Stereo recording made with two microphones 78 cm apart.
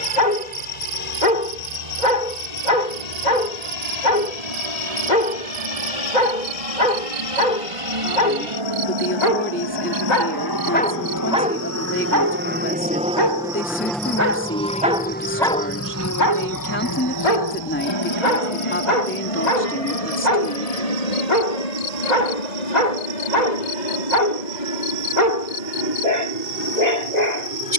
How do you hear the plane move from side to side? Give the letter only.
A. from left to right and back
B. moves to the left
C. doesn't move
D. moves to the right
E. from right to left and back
B.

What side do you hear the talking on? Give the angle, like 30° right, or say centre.
20° left.